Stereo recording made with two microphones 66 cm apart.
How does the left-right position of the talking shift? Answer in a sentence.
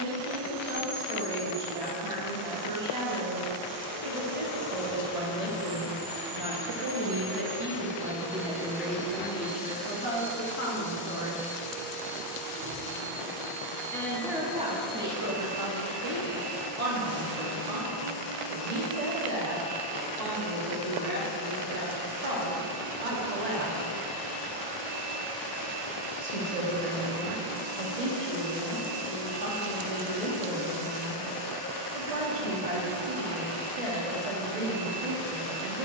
In this clip you hear the talking go left and come back.